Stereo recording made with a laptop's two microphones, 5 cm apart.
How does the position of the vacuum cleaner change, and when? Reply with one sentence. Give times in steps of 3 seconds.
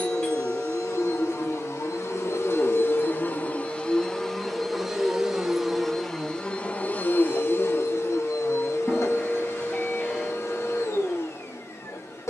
In this clip you hear the vacuum cleaner on the left from 0 s, in the centre from 3 s and on the left from 6 s.